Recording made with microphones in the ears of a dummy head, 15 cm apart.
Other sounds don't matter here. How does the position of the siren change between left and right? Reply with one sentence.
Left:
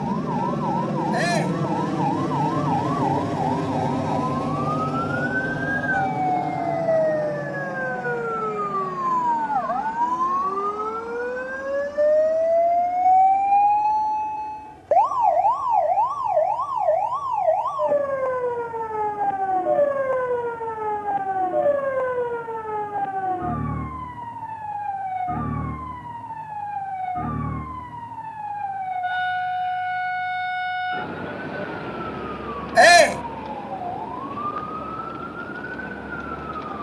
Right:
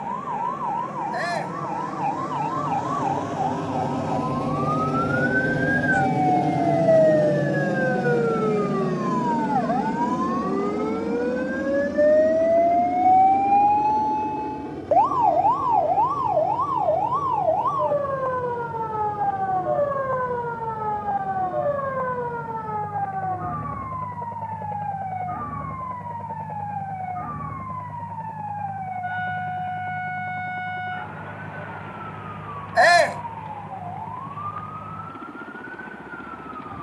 In this clip you hear the siren move from right to left.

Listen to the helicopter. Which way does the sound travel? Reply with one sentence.
You can hear the helicopter travel towards the right.